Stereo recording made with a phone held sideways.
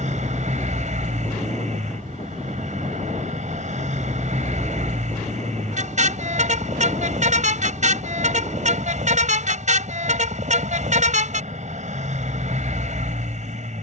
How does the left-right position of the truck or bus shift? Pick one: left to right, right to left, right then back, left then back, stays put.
stays put.